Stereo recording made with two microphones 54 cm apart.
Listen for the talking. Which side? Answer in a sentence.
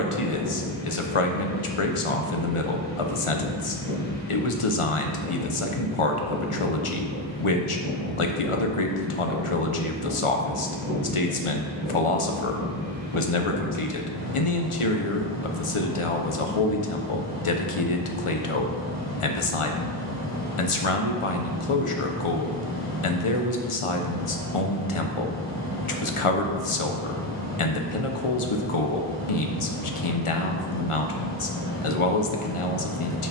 In this clip you hear the talking on the left.